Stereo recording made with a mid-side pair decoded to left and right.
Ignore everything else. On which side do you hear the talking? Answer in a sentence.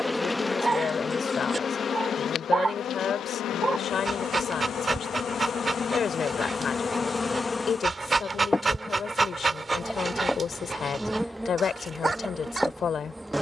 You can hear the talking on the left.